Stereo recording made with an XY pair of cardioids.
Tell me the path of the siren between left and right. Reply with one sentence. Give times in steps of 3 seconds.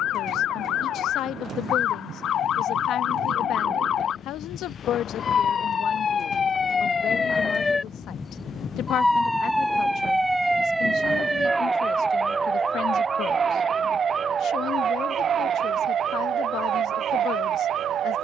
You can hear the siren on the left from 0 s, in the centre from 9 s and on the right from 12 s.